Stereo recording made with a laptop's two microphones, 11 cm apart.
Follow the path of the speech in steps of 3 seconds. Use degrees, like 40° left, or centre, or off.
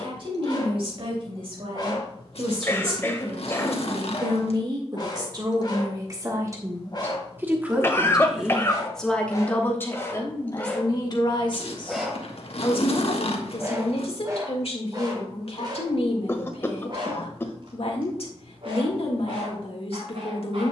50° right, 40° right, 20° right, 30° left, 60° left, 60° left, 60° left.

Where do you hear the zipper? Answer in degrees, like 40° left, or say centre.
70° left.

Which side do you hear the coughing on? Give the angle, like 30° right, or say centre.
20° left.